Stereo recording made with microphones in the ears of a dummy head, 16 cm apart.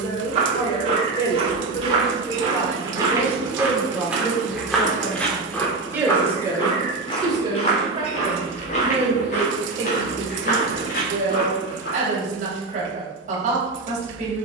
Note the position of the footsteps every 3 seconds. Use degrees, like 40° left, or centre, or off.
30° right, centre, 30° left, 60° left, off.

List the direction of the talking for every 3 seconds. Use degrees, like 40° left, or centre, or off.
30° left, centre, 20° right, 40° right, 50° right.